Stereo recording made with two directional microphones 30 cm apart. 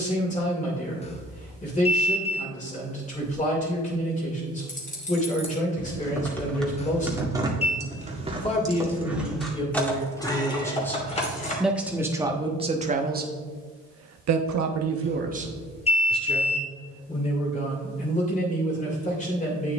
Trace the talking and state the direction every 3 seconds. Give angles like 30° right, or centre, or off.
20° left, 20° left, 20° left, 10° left, 30° right, centre, 20° left.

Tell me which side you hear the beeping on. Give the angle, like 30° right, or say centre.
20° left.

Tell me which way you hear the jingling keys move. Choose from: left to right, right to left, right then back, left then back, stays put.
right then back.